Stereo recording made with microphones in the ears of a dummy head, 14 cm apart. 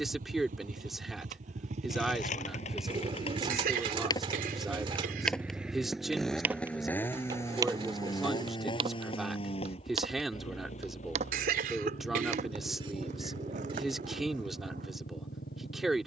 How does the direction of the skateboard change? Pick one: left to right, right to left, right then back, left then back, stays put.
left to right.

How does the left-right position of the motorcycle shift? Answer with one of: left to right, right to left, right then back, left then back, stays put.
right to left.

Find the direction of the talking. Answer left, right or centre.
centre.